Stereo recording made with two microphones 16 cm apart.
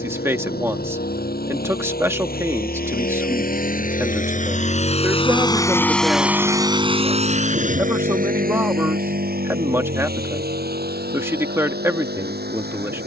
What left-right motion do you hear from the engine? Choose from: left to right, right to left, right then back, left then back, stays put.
left to right.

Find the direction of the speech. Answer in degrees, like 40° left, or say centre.
20° right.